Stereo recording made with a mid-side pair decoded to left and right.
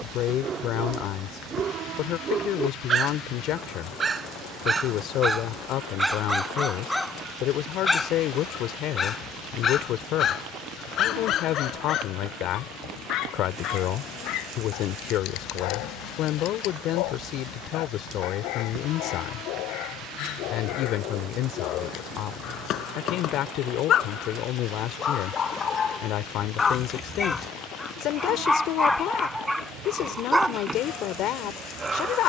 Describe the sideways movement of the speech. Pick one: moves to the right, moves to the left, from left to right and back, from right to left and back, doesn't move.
doesn't move.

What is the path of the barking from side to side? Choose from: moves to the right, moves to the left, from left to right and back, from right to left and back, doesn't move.
from right to left and back.